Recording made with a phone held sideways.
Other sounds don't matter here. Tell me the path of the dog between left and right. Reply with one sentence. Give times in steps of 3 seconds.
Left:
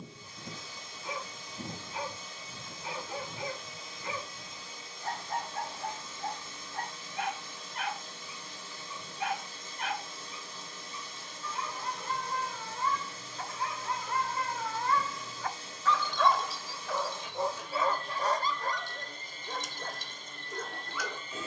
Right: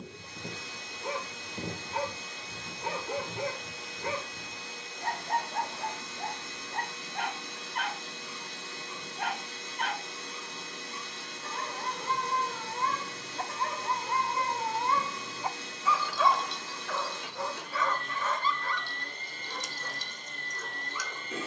You can hear the dog on the right from 0 s, in the centre from 15 s and on the left from 18 s.